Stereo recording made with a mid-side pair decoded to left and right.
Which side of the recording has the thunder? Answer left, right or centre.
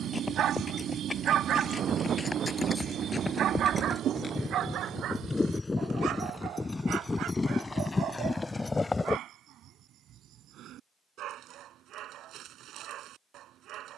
right.